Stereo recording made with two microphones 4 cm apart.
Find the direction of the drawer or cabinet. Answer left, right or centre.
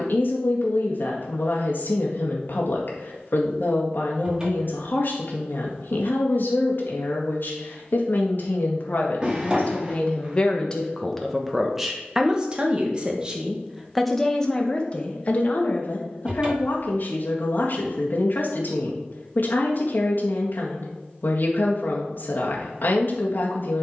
right.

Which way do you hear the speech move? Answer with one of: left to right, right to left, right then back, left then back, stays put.
right then back.